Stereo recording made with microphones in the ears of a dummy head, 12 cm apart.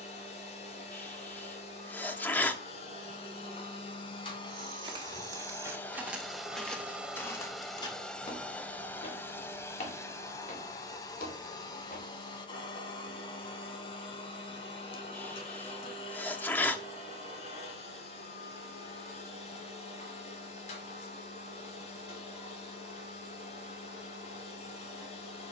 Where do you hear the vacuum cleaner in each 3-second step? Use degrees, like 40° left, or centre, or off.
50° left, 30° left, centre, 20° left, 40° left, 40° left, 50° left, 50° left, 50° left.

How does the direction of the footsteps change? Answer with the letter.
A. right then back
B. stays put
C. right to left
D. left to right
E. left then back
C.